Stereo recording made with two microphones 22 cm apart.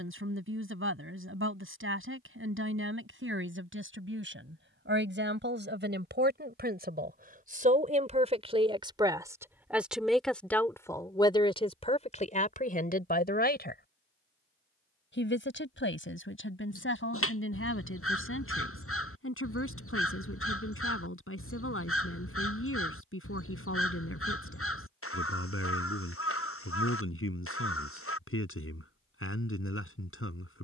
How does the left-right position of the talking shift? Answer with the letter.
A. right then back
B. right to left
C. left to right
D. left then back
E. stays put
B.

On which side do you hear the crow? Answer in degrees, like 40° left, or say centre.
80° left.